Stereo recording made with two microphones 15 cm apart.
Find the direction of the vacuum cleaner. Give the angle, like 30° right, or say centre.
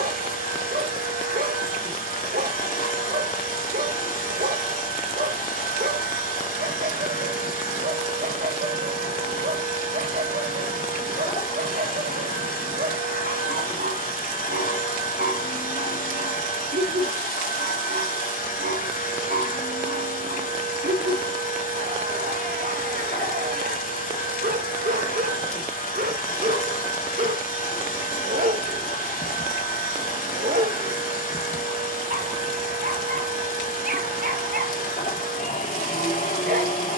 70° left.